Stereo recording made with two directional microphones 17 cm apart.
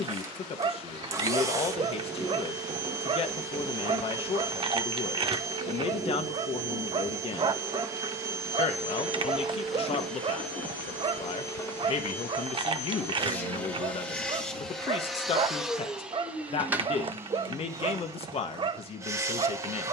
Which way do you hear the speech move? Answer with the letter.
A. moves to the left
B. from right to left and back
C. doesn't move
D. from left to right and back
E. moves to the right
C.